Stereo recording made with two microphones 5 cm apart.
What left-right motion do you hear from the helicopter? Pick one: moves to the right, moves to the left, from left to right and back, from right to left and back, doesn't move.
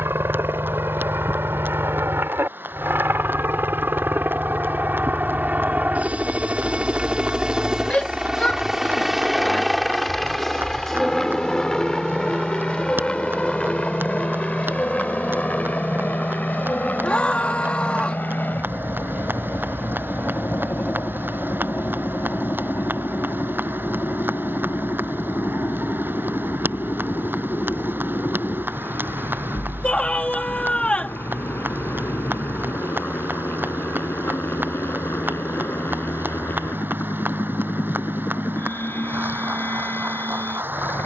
moves to the left.